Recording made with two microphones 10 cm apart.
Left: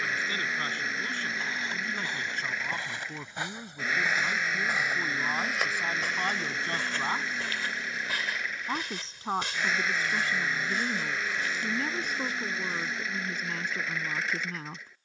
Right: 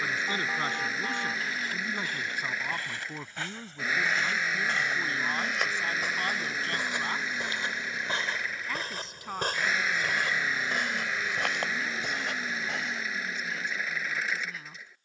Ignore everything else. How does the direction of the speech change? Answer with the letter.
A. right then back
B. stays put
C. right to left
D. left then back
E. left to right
C.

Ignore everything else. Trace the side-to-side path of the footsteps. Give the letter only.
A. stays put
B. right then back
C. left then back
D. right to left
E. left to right
E.